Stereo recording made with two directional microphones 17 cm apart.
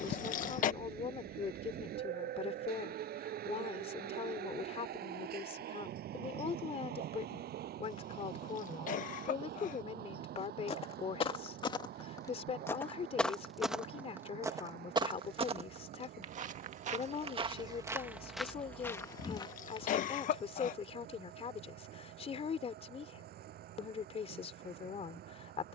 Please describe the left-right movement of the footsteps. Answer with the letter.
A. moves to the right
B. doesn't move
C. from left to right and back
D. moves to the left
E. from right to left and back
C.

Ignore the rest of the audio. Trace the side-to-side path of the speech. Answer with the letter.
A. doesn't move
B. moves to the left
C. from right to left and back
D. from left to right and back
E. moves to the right
A.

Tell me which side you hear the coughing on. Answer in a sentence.
In this clip you hear the coughing on the left.